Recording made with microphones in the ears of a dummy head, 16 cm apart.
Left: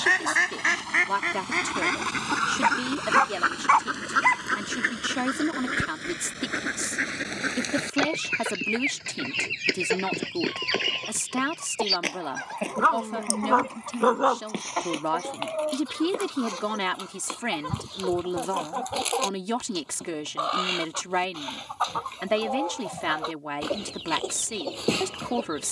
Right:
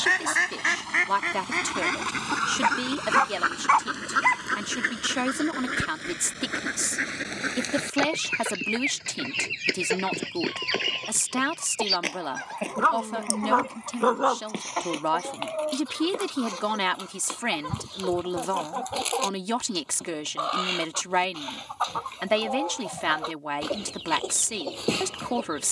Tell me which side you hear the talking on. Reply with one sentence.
In this clip you hear the talking on the right.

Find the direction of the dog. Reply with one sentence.
In this clip you hear the dog in the centre.